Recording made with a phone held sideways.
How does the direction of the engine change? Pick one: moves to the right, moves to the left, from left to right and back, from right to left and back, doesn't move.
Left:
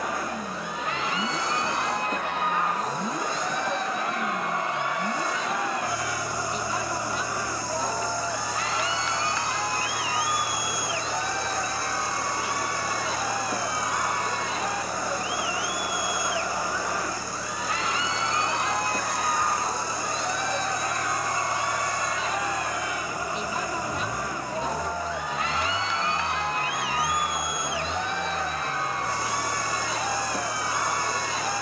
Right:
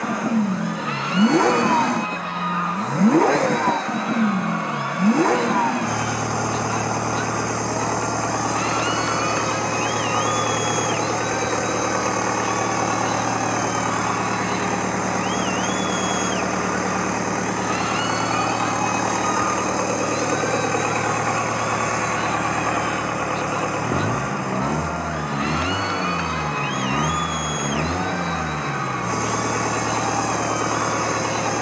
doesn't move.